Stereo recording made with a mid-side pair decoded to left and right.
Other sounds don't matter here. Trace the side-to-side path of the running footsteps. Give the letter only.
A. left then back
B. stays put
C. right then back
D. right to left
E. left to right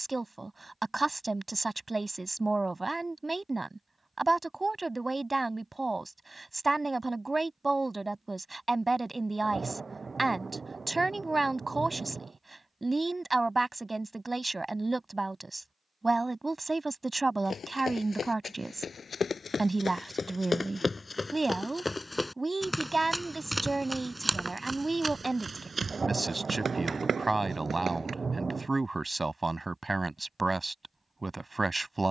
E.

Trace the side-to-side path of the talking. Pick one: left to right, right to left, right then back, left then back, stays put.
stays put.